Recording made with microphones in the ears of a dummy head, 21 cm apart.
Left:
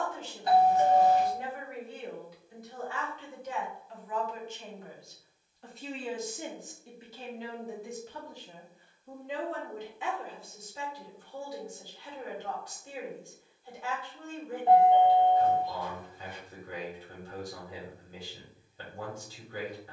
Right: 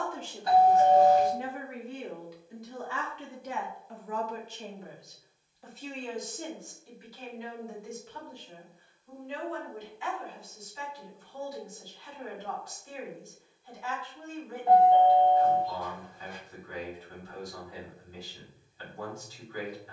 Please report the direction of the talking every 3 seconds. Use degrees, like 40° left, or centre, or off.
60° right, 30° right, 20° left, 50° left, 50° left, 50° left, 50° left.